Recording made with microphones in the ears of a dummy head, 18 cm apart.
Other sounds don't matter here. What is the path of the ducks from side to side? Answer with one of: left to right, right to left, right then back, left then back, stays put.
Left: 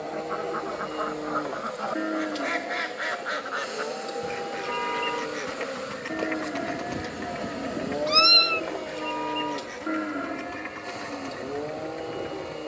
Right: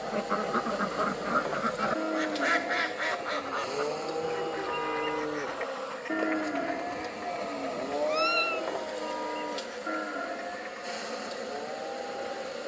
right to left.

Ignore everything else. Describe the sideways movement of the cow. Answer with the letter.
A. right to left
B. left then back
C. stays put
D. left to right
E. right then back
E.